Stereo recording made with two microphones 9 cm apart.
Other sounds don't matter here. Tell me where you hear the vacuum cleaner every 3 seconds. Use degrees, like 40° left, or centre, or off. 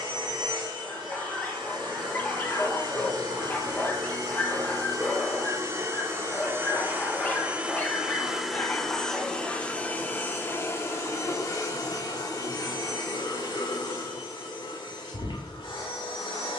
50° right, 40° right, 10° right, 20° left, 50° left, 60° left.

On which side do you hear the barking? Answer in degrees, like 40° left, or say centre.
20° left.